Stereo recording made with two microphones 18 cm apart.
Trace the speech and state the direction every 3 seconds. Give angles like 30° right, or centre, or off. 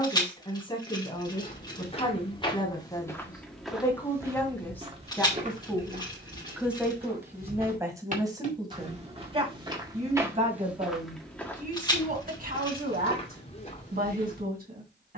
30° left, 10° left, 20° right, 40° right, 60° right.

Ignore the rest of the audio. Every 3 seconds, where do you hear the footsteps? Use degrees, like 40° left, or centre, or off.
30° left, 20° right, 50° right, 10° right, 30° left.